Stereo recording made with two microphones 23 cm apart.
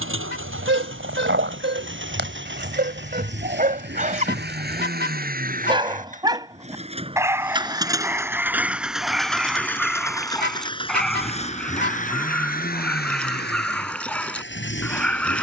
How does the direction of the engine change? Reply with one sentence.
In this clip you hear the engine go from the right side to the left.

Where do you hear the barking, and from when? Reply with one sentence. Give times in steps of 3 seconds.
In this clip you hear the barking on the right from 0 s and in the centre from 6 s.